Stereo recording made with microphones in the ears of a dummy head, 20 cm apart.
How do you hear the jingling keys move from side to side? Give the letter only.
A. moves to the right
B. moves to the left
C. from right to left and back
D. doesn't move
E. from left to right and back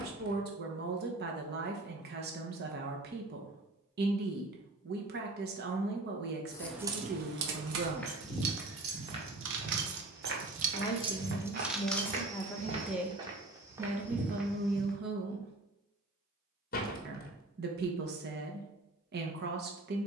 E.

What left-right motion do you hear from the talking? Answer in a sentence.
You can hear the talking go left and come back.